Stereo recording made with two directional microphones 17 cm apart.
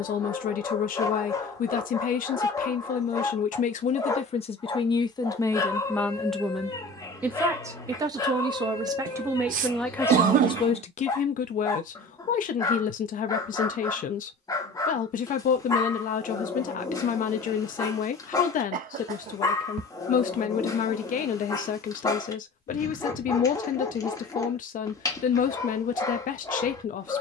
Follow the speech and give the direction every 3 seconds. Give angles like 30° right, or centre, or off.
50° left, 30° left, 10° right, 20° left, 50° left, 50° left, 50° left, 50° left, 50° left.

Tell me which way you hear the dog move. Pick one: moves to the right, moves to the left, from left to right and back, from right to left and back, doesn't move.
doesn't move.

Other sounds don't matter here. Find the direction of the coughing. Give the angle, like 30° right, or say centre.
50° right.